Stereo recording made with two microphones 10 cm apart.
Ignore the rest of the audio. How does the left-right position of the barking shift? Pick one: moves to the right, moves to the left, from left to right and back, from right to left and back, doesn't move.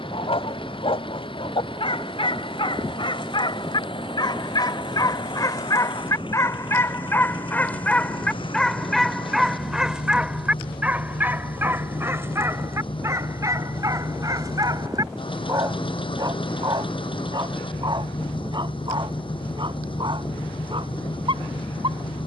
moves to the right.